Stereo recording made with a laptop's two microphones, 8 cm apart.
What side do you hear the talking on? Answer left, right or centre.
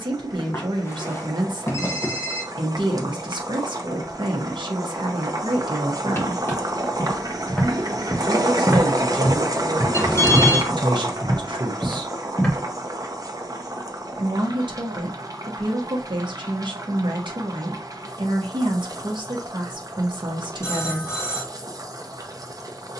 right.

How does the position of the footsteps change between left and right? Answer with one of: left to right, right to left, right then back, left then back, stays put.
right then back.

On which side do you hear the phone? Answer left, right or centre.
left.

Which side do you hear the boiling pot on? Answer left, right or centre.
right.